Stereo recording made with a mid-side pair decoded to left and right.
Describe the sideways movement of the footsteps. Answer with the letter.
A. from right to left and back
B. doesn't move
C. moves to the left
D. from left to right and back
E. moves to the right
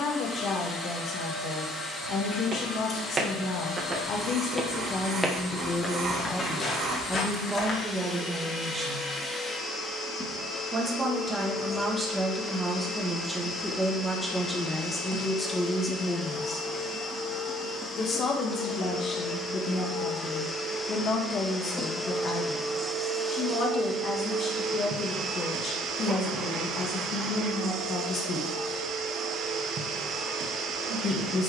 C.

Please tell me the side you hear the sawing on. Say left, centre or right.
right.